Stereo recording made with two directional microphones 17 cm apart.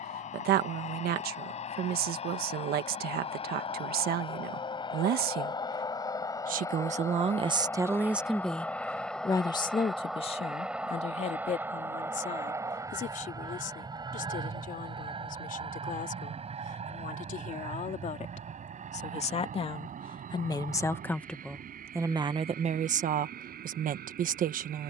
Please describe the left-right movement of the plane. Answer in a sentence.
You can hear the plane travel towards the right.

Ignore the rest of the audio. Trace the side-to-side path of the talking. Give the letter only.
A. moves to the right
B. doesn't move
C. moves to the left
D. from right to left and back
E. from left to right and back
D.